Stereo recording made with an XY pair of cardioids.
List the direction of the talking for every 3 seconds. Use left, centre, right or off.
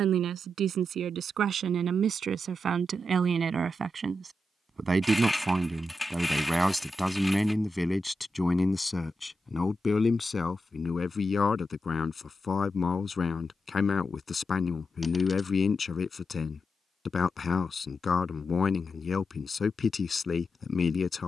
right, right, centre, left, left, left, left.